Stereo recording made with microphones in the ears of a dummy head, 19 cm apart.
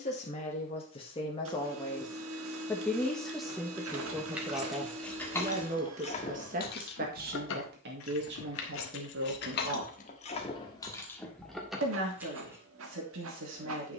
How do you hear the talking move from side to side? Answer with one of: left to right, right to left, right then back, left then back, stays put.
left to right.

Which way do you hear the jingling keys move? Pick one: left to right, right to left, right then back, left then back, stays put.
left then back.